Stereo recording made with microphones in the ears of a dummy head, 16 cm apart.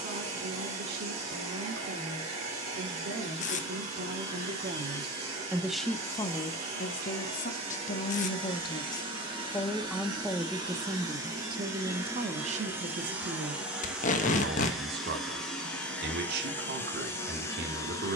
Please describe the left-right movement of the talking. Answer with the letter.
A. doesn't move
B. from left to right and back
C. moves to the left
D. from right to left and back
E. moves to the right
D.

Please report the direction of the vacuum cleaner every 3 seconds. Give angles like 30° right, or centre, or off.
30° right, 30° right, 30° right, 20° right, 10° right, 10° left.